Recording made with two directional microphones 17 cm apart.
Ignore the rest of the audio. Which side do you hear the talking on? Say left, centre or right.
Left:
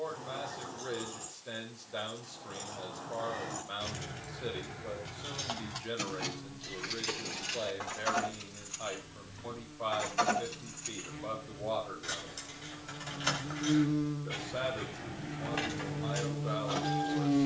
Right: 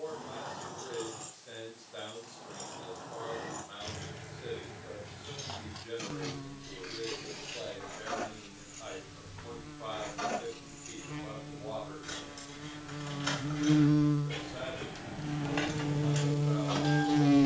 left.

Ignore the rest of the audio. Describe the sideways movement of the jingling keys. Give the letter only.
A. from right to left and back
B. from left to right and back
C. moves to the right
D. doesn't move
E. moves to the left
A.